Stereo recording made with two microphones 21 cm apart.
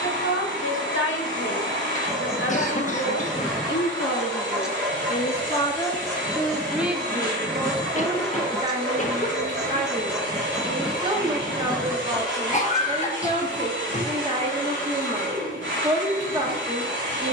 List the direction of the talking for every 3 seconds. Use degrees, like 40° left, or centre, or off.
70° left, 40° left, 20° right, 20° right, 20° right, 20° right.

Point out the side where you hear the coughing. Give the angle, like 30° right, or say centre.
40° left.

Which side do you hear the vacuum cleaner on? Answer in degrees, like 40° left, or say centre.
60° right.